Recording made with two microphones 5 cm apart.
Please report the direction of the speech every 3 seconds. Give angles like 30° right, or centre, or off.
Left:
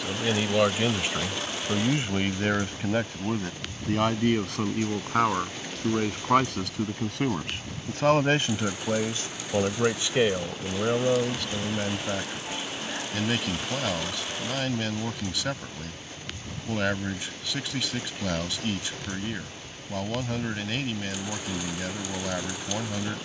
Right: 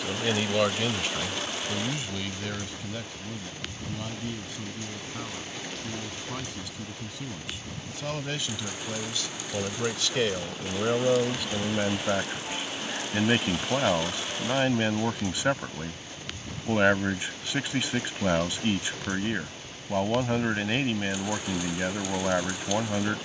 30° left, 70° left, 60° left, 10° left, 20° right, 20° right, 20° right, 20° right.